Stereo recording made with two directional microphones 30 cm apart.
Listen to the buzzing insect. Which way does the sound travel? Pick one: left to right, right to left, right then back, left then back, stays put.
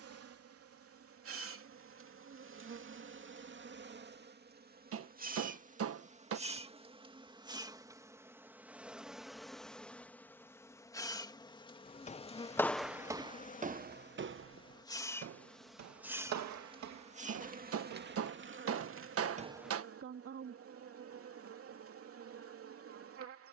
left then back.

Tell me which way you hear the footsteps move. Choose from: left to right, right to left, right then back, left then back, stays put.
right then back.